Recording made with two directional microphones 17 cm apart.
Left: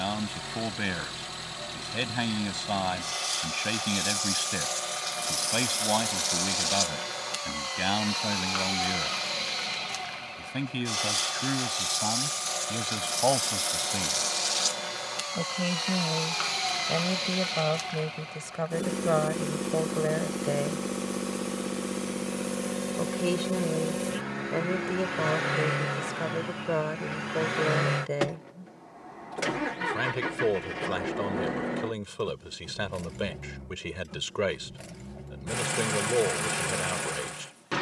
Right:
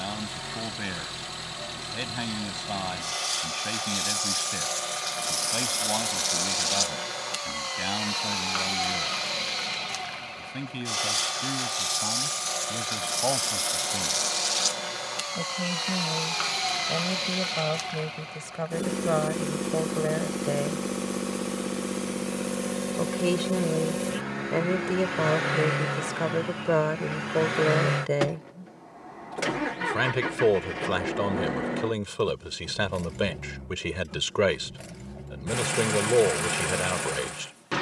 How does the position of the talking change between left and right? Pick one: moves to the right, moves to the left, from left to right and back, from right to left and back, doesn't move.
moves to the right.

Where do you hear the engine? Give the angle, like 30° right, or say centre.
10° right.